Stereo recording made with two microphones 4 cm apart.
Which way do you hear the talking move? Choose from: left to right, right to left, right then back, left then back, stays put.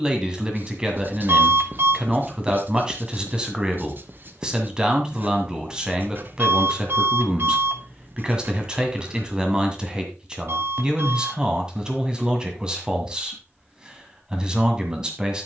stays put.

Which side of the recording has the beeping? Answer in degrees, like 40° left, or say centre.
60° right.